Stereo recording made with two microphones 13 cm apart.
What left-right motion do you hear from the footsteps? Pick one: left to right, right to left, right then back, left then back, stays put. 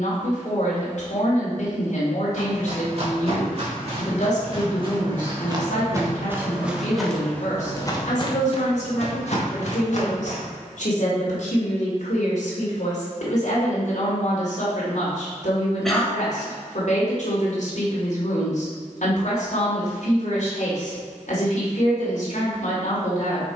right to left.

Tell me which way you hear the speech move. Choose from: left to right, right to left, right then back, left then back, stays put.
stays put.